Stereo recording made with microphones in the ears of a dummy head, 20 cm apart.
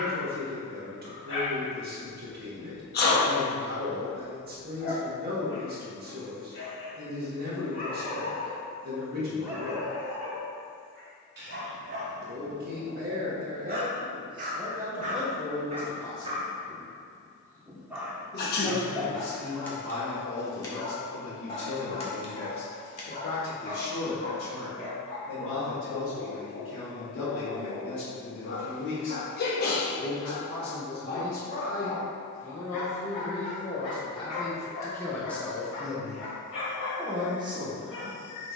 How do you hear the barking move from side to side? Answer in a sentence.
In this clip you hear the barking go right and come back.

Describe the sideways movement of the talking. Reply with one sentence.
You can hear the talking go left and come back.